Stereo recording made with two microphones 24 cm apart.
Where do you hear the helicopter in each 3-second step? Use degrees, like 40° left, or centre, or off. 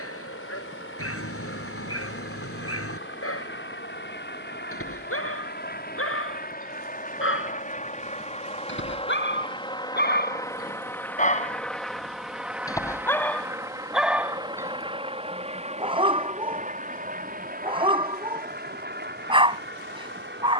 60° left, 50° left, 30° left, 10° left, 10° right, 30° right, 40° right.